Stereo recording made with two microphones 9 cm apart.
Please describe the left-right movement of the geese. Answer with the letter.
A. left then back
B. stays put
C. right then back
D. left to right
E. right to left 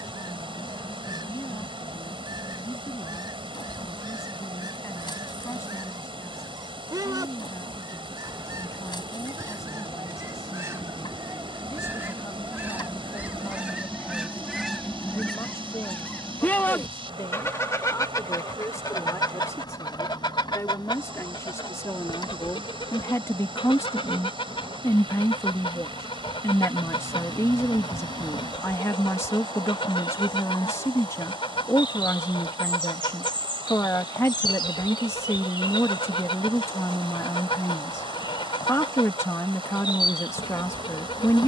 E.